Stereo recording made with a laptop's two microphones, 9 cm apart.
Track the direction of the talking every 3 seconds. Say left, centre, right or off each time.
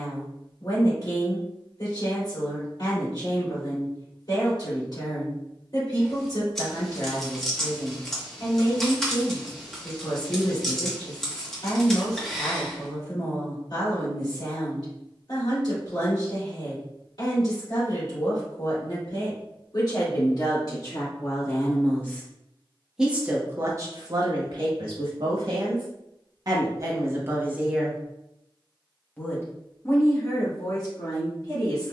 left, left, left, left, left, left, left, centre, right, centre, left.